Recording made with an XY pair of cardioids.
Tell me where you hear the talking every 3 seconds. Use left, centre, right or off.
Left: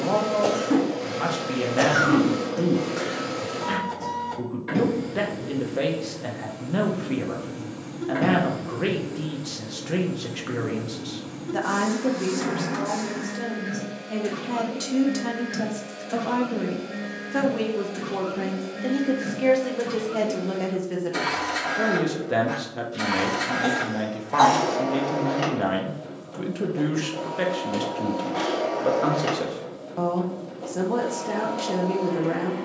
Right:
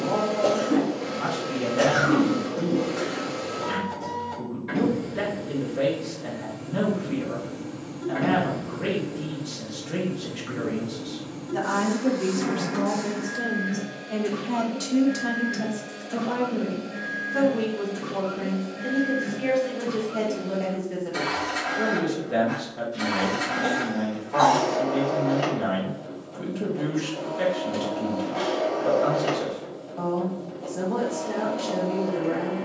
left, left, left, left, centre, left, left, left, left, left, left.